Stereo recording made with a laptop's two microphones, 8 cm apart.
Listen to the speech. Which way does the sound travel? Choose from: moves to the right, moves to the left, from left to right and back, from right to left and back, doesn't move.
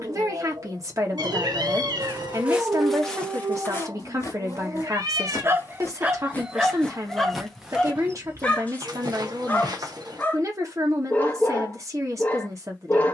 doesn't move.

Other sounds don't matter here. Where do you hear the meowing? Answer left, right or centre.
right.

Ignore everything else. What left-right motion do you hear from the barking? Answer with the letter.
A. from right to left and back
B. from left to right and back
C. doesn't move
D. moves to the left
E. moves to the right
D.